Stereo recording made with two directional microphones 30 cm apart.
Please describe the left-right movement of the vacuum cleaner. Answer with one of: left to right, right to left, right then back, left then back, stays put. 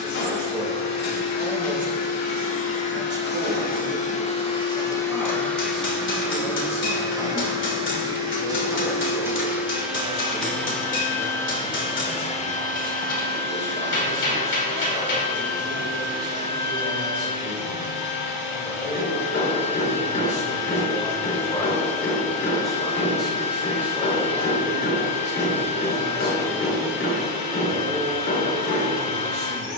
right then back.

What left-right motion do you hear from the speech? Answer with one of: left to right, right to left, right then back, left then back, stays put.
left then back.